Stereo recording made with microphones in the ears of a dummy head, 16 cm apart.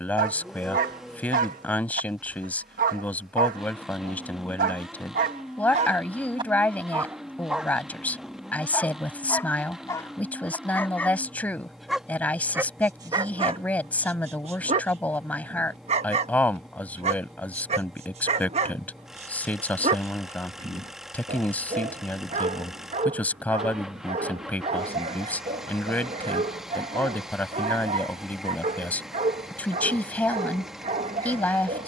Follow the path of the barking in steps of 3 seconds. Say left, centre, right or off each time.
right, right, centre, centre, right, right, right, right, right, right, right.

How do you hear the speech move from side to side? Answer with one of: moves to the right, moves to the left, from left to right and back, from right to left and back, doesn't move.
doesn't move.